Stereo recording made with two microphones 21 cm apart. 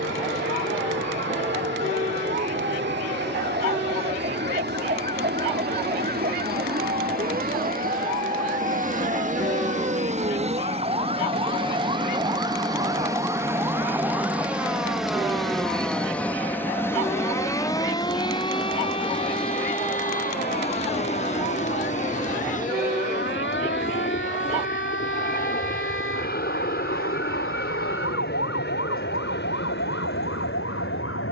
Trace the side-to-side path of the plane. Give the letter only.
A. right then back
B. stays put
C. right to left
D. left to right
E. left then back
C.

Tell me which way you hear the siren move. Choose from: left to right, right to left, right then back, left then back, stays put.
right to left.